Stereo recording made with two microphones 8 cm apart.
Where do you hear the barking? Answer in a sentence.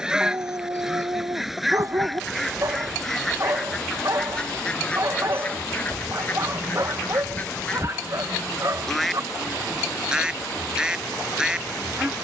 In this clip you hear the barking on the right.